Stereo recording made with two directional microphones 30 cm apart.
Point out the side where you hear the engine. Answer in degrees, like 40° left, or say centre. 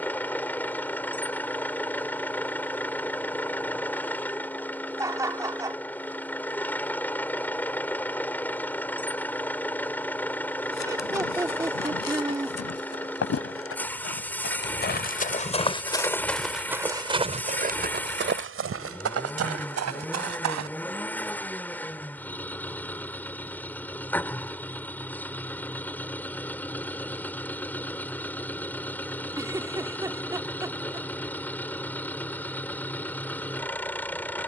10° left.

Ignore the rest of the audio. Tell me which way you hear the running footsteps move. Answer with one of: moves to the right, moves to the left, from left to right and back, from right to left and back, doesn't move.
moves to the right.